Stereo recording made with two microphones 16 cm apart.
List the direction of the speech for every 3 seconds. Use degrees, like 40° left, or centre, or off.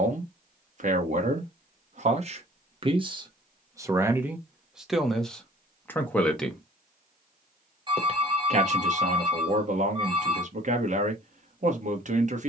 50° right, 10° right, 20° right, 50° right.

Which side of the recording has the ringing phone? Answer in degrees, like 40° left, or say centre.
30° right.